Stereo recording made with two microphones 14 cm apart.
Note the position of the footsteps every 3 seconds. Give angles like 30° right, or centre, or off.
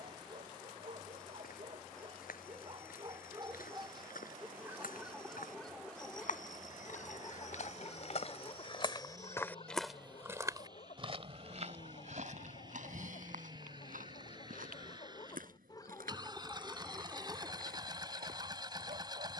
80° left, 80° left, 60° left, 20° right, 70° right, 80° right, 80° right.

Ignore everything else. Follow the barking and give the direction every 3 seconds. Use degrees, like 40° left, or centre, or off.
40° right, 10° right, 30° left, 50° left, 60° left, 10° left, 60° right.